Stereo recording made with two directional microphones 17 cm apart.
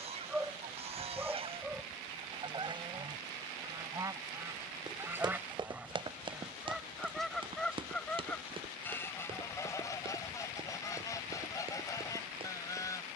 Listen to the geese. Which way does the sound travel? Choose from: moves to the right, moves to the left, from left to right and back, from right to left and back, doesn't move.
moves to the left.